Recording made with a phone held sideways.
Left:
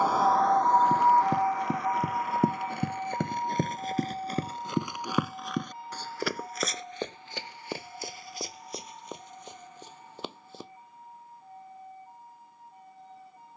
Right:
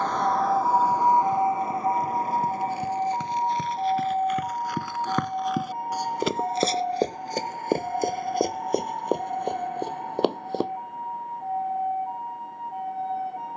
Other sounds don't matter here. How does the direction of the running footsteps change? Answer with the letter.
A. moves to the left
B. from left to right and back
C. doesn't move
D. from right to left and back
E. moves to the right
E.